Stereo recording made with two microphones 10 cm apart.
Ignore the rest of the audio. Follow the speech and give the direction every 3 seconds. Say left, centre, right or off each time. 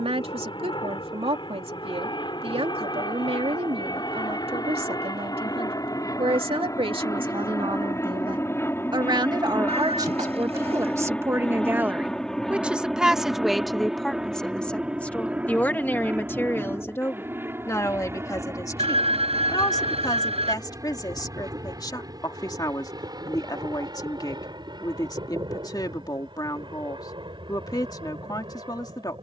right, right, right, right, centre, left, left, left, left, left.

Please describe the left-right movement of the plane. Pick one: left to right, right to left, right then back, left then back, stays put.
left to right.